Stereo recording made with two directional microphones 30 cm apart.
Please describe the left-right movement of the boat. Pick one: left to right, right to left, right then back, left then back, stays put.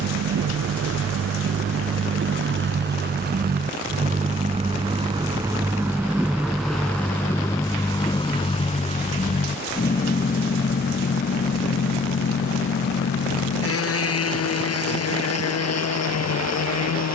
right to left.